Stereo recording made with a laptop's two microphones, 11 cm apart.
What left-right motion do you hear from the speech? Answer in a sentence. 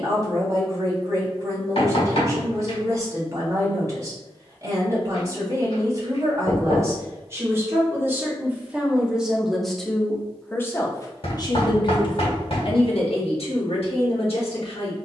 You can hear the speech move to the left.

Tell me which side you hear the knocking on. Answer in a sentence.
You can hear the knocking on the left.